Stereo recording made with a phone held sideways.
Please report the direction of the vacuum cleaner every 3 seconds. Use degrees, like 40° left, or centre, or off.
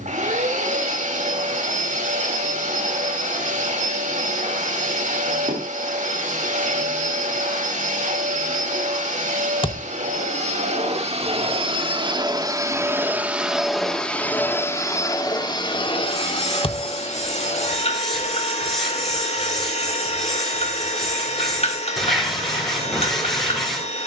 60° right, 60° right, 60° right, 50° right, 10° right, 40° left, 50° left, 50° left.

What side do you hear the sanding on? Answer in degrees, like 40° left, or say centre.
centre.